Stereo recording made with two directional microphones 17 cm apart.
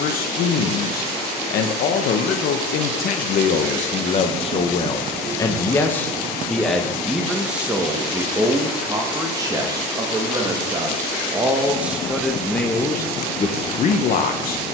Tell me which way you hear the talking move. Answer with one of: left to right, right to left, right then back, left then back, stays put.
right then back.